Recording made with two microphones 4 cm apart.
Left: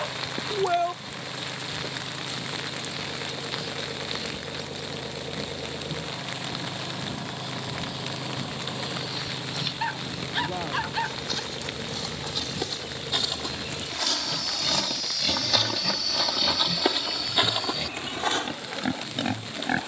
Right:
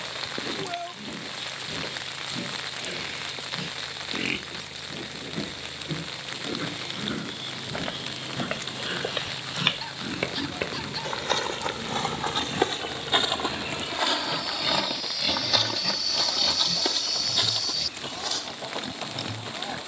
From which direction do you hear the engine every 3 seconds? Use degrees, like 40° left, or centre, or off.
50° left, 50° left, 40° left, 20° left, centre, 30° right, 50° right.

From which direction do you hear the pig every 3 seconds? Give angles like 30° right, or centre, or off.
70° right, 60° right, 60° right, 50° right, 30° right, 10° left, 40° left.